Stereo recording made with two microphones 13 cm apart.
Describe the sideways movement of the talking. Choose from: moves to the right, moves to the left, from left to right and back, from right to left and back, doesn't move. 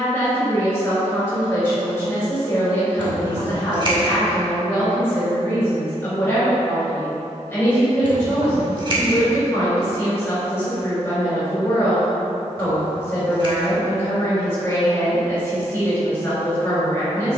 doesn't move.